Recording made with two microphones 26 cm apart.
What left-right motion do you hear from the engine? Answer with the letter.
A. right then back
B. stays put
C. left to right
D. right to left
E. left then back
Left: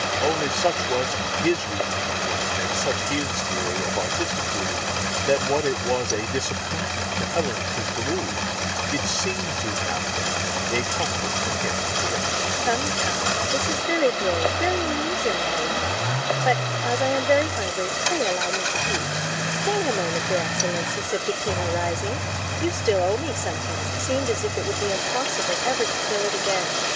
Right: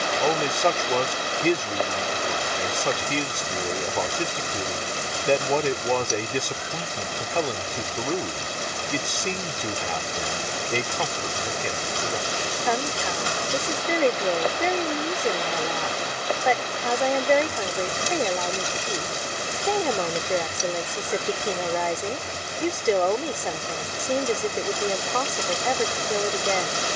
B.